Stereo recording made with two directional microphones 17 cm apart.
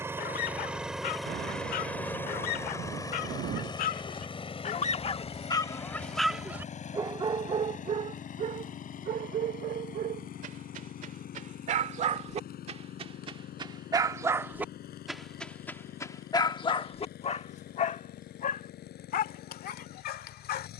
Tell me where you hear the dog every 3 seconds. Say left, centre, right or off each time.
left, left, right, right, right, left, left.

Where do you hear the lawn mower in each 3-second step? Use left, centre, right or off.
centre, left, left, left, left, left, left.